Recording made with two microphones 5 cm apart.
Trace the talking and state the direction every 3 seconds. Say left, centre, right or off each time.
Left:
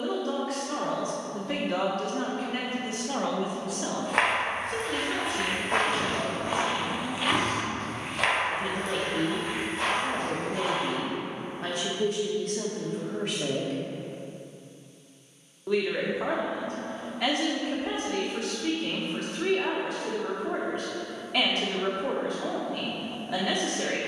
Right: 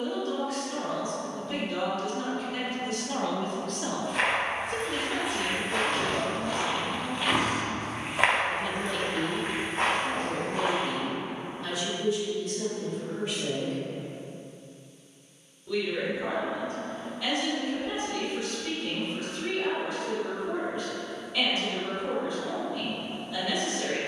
left, centre, centre, left, left, left, left, left.